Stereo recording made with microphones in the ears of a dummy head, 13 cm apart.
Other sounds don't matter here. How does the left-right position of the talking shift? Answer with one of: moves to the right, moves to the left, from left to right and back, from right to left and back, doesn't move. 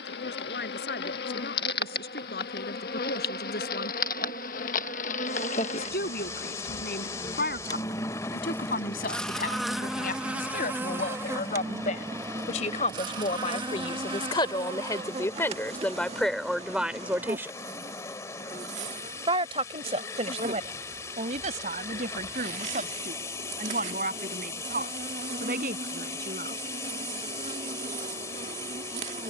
moves to the right.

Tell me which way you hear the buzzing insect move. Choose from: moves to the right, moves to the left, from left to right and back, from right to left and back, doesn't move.
moves to the right.